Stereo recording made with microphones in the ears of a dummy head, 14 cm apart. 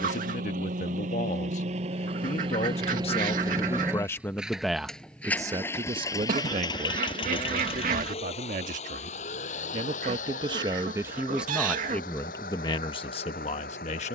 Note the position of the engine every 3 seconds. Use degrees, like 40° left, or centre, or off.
50° right, centre, 30° left, 50° left, 60° left.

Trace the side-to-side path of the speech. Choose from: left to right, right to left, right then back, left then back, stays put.
right then back.